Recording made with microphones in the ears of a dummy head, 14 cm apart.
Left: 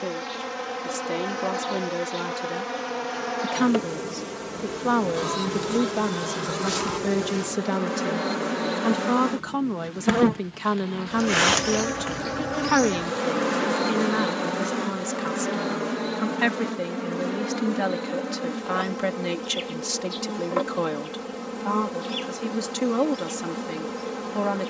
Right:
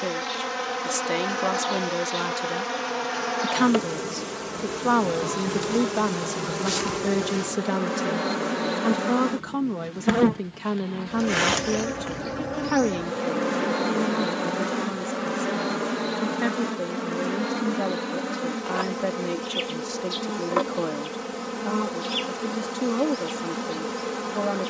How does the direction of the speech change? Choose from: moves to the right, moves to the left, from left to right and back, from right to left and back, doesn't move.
moves to the left.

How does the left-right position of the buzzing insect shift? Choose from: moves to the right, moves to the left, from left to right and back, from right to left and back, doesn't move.
from right to left and back.